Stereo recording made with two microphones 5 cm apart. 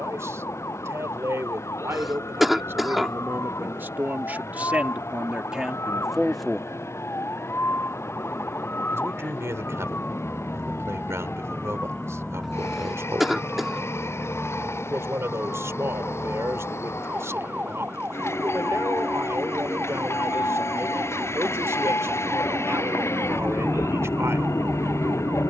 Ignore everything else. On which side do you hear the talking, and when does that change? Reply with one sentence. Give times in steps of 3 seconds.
You can hear the talking on the right from 0 s, in the centre from 6 s and on the right from 9 s.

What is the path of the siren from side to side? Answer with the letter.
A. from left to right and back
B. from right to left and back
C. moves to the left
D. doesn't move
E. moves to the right
E.